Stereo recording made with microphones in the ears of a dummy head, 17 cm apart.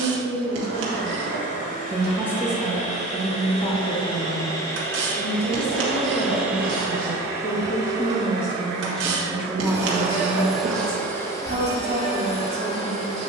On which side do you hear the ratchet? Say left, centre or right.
right.